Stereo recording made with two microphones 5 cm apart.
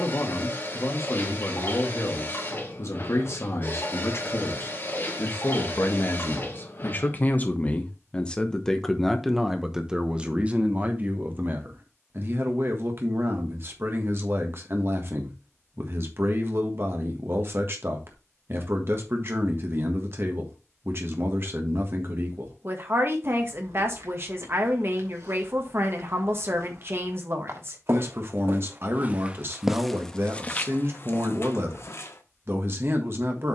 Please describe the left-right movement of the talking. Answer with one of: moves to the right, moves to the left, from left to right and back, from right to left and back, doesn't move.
moves to the right.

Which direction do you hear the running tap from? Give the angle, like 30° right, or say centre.
50° left.